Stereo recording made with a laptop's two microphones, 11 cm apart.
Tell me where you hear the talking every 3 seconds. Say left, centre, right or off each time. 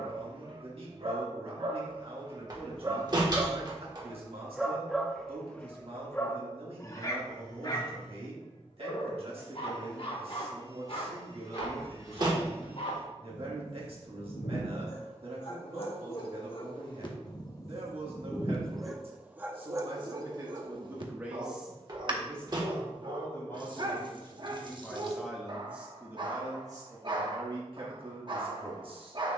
right, right, right, right, right, right, right, centre, centre, right.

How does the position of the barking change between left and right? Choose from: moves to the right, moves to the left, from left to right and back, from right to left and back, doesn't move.
from right to left and back.